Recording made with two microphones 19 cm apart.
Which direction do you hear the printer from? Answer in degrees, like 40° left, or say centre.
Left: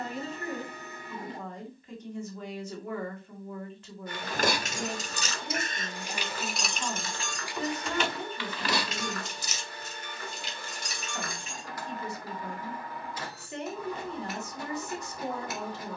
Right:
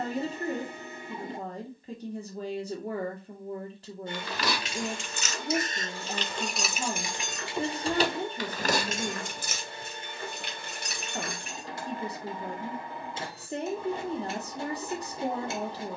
30° right.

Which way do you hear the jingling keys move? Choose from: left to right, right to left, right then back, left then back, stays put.
left to right.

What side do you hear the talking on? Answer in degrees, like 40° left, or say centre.
30° right.